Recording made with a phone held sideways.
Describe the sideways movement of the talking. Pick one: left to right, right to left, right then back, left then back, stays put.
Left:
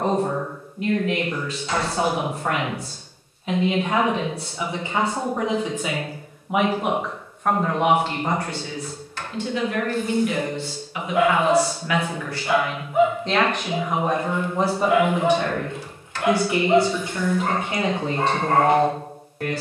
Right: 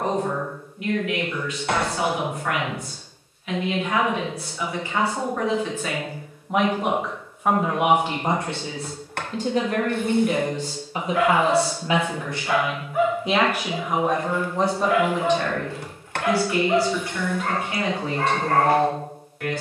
right then back.